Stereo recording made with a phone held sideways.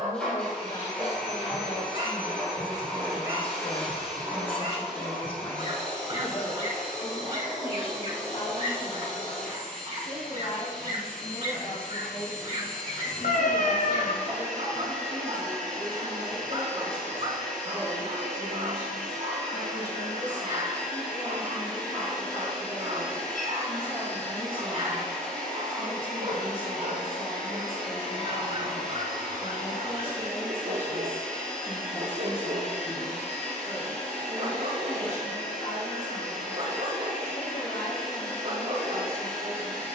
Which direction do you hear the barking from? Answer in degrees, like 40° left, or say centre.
50° right.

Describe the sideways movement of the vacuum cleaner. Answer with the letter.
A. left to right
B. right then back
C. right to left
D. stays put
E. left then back
D.